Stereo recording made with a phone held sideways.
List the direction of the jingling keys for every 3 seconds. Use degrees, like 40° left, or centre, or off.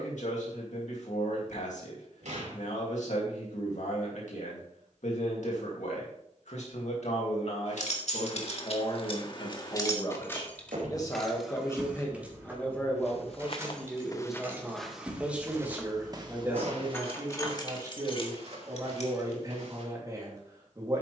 off, off, 60° left, 20° left, 20° right, 10° left, 50° left.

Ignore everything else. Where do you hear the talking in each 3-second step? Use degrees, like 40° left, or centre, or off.
70° left, 70° left, 60° left, 30° left, centre, 20° right, 30° right.